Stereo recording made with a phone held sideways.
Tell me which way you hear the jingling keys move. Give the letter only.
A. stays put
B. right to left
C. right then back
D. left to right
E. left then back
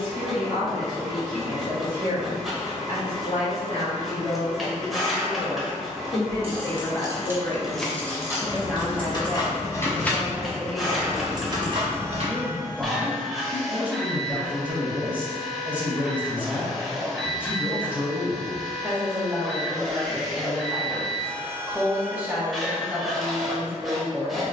E.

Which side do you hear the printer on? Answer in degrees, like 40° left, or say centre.
centre.